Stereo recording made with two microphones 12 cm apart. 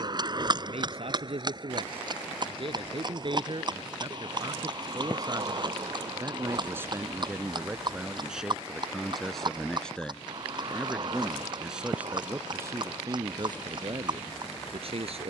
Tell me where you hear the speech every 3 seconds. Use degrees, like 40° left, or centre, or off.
50° right, 40° right, 10° right, centre, 30° right.